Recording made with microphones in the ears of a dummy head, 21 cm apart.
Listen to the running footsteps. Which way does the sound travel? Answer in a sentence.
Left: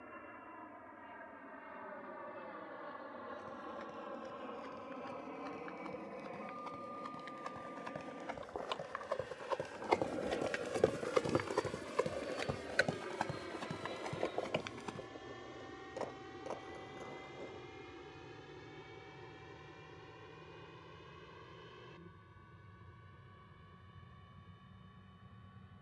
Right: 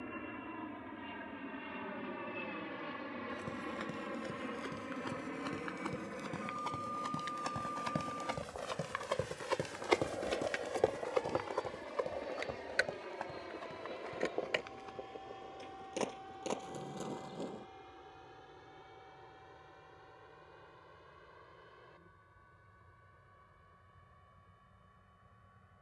You can hear the running footsteps travel towards the left.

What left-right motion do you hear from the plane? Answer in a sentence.
In this clip you hear the plane move to the left.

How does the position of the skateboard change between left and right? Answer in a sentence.
You can hear the skateboard go from the left side to the right.